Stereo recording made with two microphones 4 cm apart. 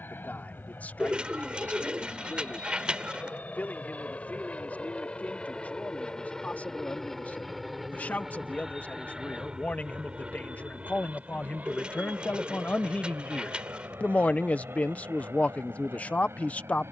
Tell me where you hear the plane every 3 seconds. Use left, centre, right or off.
left, left, centre, right, right, right.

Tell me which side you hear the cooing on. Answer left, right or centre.
right.